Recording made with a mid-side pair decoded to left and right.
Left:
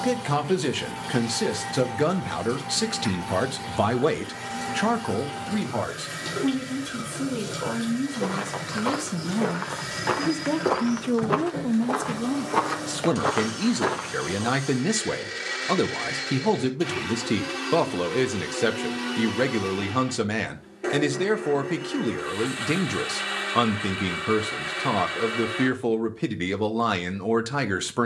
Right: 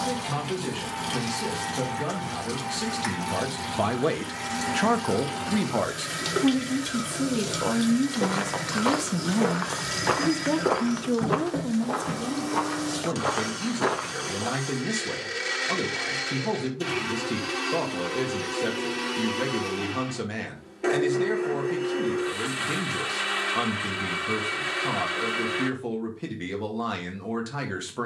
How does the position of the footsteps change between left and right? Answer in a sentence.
You can hear the footsteps move from right to left and back again.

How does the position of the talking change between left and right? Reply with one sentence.
In this clip you hear the talking move from left to right and back again.